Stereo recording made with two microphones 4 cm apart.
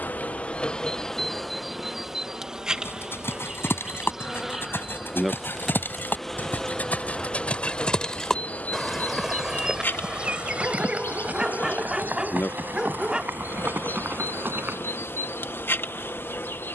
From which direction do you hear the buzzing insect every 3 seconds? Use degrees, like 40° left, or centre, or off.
10° left, 10° right, 20° left, 60° left, 60° left, 60° left.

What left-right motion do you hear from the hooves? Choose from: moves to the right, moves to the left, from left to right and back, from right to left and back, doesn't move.
moves to the right.